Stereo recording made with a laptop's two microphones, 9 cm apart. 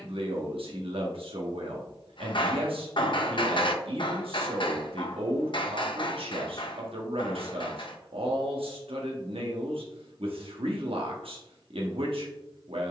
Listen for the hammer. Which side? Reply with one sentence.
You can hear the hammer on the left.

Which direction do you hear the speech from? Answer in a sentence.
You can hear the speech on the right.